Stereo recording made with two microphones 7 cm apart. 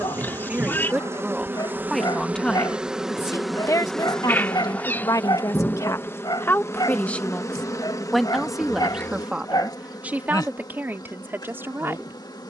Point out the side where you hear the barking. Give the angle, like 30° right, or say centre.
60° left.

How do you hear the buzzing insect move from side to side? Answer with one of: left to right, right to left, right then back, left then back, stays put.
right to left.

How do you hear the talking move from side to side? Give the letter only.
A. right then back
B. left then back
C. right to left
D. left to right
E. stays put
B.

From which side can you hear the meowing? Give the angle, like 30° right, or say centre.
30° left.